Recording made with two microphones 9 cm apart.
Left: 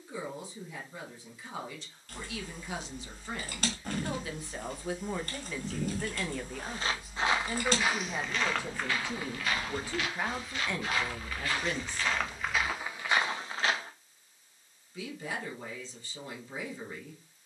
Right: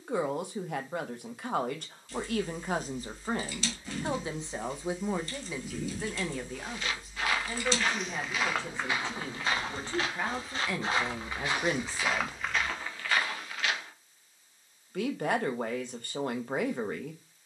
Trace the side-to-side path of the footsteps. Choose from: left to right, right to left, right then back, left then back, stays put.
right then back.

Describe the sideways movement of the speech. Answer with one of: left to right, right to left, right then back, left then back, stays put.
left then back.